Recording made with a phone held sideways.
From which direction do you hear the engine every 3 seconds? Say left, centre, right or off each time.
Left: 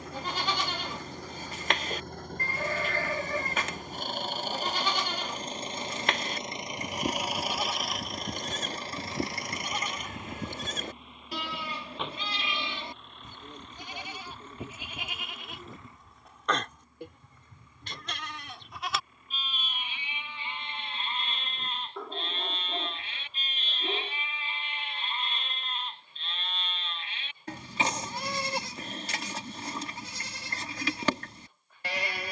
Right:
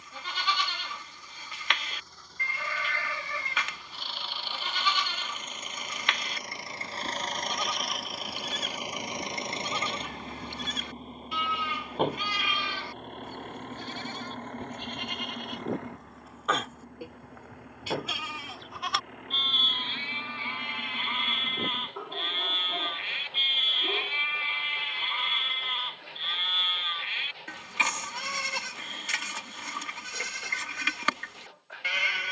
left, left, centre, right, right, right, right, right, right, right, right.